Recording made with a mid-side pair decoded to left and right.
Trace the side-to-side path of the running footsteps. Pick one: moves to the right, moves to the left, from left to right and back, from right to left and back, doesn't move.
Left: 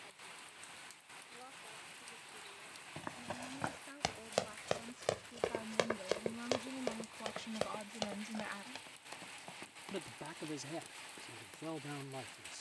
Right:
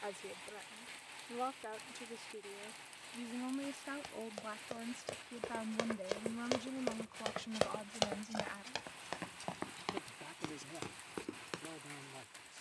moves to the right.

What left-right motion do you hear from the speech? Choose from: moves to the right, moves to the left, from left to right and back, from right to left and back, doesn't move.
moves to the left.